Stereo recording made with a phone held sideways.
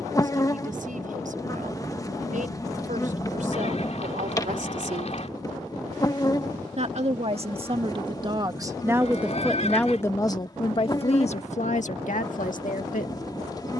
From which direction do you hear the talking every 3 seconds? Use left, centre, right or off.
right, right, right, left, left.